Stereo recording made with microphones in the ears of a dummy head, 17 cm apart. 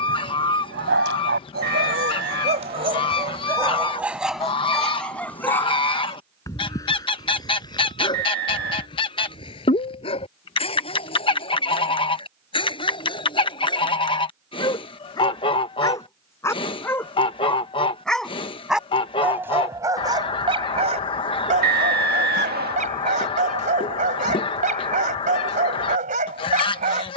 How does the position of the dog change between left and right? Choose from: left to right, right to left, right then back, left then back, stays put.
left then back.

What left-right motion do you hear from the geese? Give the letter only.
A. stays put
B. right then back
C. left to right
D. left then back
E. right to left
A.